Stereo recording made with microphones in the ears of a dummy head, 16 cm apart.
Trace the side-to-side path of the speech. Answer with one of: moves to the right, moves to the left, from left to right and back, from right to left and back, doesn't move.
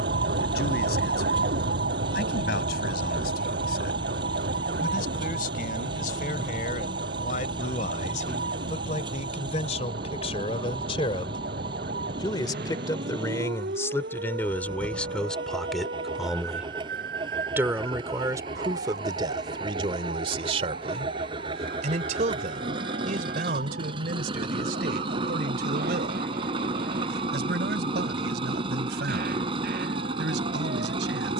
moves to the right.